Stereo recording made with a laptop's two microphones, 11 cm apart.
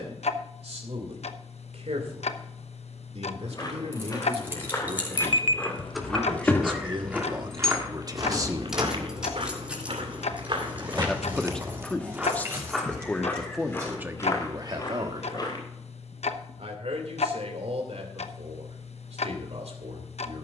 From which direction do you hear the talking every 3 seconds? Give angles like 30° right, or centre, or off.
80° right, 60° right, 40° right, 10° left, 10° right, 70° right, 80° right.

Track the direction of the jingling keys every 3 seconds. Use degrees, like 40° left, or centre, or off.
off, 20° right, centre, 10° right, 20° right, off, off.